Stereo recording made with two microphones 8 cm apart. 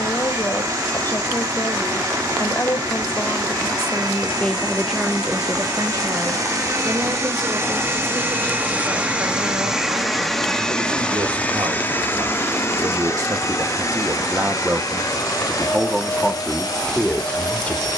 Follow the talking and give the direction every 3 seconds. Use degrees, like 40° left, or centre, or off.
30° left, 10° left, 70° right, 70° right, 40° right, centre.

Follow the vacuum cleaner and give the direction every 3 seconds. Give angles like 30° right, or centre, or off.
60° right, 60° right, 40° right, 10° left, 50° left, 60° left.